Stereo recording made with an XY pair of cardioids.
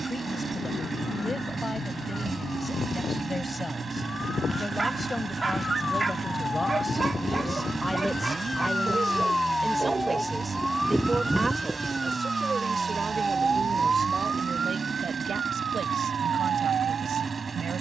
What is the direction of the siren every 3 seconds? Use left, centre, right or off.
left, left, left, centre, right, right.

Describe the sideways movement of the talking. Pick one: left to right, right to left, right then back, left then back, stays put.
left to right.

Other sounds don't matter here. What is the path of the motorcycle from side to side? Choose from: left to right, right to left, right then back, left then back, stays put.
stays put.